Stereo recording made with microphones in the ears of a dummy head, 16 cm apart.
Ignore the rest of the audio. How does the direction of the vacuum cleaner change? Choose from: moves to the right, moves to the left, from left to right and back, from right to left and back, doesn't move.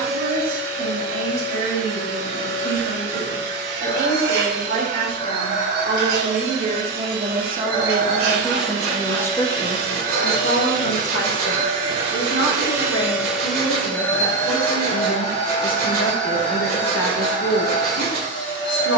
moves to the left.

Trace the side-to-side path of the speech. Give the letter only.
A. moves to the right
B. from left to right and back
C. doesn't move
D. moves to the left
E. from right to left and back
D.